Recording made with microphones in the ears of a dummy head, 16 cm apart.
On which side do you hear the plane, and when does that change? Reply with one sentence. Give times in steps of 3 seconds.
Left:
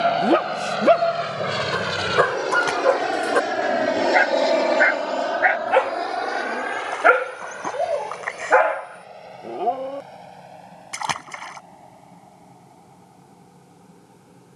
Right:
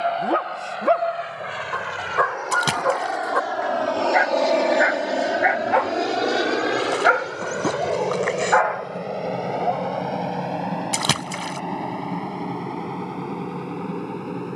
In this clip you hear the plane on the left from 0 s, in the centre from 3 s and on the right from 6 s.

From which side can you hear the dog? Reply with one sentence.
In this clip you hear the dog on the left.